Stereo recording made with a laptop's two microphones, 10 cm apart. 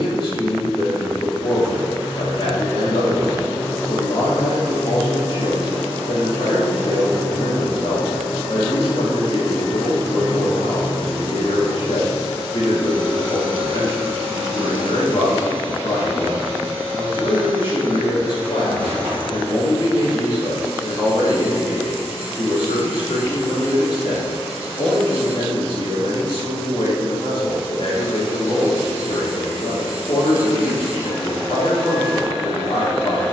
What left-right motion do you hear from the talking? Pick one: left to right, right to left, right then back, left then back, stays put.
stays put.